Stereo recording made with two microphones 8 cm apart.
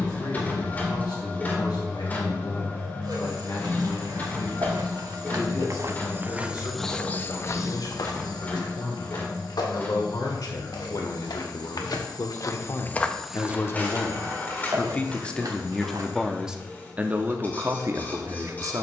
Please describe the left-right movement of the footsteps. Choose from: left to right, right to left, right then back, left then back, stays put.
left then back.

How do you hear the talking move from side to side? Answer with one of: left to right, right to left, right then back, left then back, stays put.
left to right.